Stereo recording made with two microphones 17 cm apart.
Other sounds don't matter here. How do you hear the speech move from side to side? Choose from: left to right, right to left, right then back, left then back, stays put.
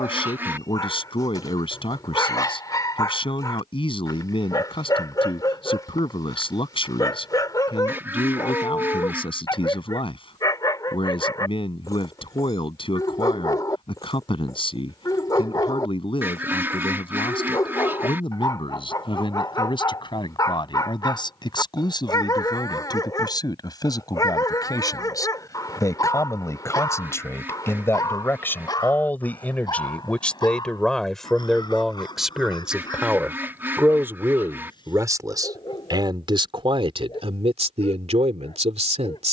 left to right.